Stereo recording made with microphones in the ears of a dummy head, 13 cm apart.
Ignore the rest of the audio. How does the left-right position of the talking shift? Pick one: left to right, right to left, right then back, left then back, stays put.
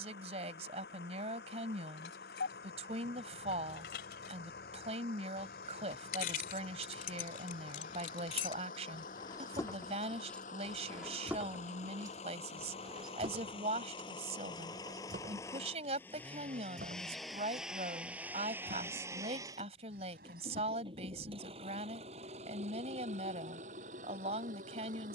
stays put.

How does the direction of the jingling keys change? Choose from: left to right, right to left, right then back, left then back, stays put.
left to right.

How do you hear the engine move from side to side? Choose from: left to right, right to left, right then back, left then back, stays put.
left to right.